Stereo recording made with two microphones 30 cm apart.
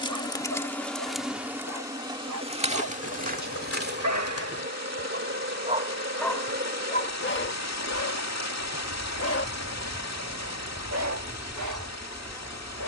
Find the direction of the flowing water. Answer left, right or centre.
left.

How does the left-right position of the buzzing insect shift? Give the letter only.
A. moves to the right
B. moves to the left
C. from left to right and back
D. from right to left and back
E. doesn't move
C.